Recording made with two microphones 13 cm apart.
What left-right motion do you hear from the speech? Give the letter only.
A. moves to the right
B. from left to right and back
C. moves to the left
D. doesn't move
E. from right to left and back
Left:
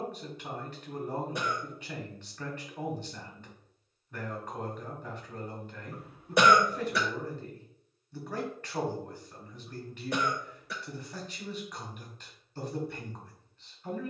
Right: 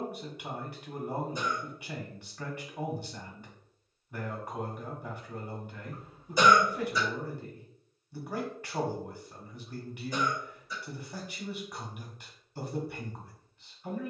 D.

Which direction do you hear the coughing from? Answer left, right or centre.
left.